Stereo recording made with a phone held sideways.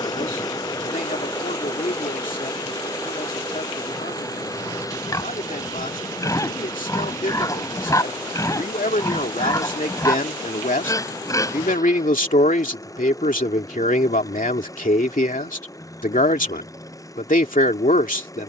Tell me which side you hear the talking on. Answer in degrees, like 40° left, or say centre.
70° left.